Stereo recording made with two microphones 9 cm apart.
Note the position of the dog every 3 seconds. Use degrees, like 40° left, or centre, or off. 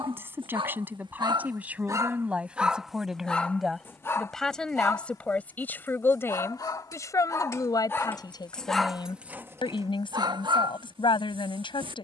40° right, 30° left, 30° left, 50° right.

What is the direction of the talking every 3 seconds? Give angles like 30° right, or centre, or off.
20° right, 10° left, 40° left, 60° left.